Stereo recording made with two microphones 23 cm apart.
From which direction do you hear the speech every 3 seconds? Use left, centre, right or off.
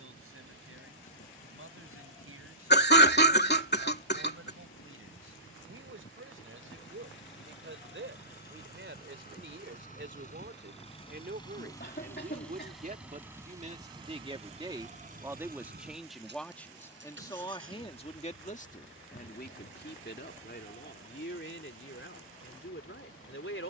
right, right, right, right, right, centre, left, left.